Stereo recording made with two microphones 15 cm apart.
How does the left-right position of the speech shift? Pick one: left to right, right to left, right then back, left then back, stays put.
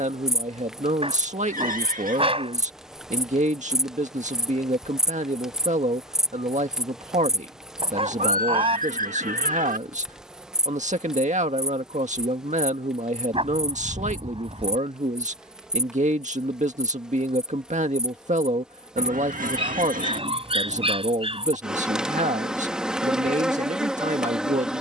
stays put.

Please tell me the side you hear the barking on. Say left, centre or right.
right.